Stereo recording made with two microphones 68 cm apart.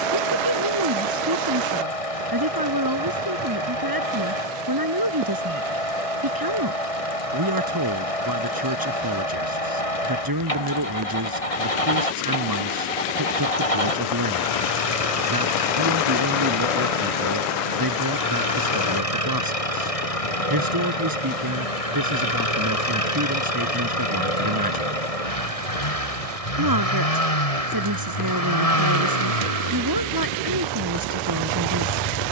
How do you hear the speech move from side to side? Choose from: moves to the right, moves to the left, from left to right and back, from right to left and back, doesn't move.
doesn't move.